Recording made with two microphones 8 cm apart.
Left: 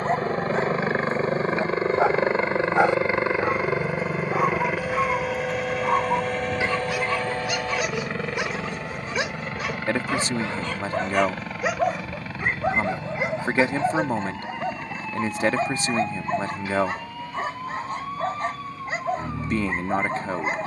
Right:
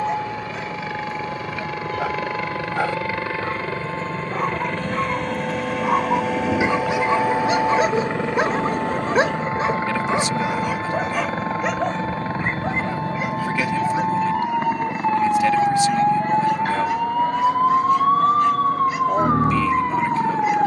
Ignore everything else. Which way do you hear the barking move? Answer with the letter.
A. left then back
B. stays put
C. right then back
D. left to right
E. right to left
C.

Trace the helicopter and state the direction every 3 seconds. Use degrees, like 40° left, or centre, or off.
40° left, 10° left, 10° right, 30° right, 40° right, 40° right, 50° right.